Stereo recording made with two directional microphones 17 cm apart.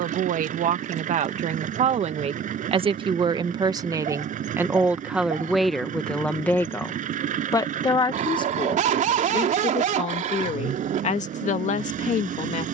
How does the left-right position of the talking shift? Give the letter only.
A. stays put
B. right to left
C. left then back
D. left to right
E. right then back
B.